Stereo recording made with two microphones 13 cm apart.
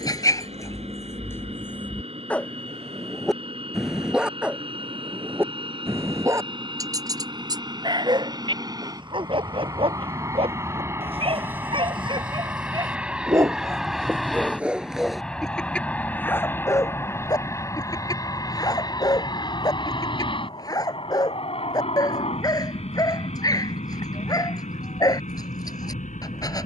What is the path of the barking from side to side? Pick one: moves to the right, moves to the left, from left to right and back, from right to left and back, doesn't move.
from left to right and back.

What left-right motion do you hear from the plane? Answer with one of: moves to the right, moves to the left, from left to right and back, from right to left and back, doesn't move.
moves to the left.